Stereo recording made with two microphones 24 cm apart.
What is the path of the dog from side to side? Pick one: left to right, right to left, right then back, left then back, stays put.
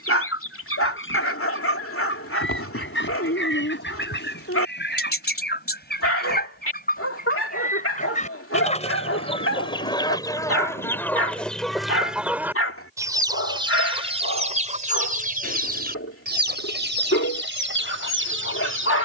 stays put.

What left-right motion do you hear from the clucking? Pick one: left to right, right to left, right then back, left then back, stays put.
left to right.